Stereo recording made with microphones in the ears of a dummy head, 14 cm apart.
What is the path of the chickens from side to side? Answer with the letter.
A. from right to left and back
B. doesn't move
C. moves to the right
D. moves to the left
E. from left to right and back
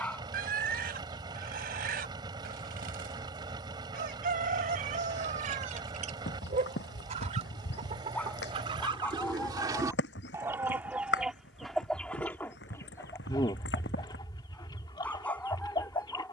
D.